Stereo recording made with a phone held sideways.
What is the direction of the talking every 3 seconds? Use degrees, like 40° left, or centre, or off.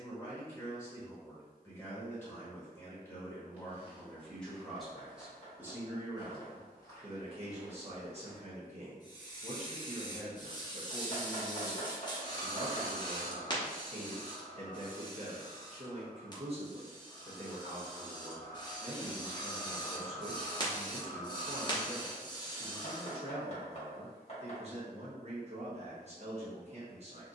20° left, centre, 40° right, 40° right, 40° right, 40° right, 40° right, 40° right, 40° right.